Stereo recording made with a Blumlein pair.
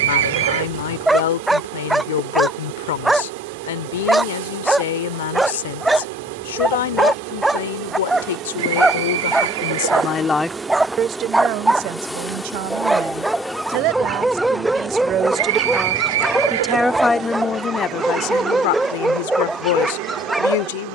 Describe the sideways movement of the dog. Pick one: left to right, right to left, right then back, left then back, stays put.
stays put.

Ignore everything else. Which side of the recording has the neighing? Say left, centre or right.
right.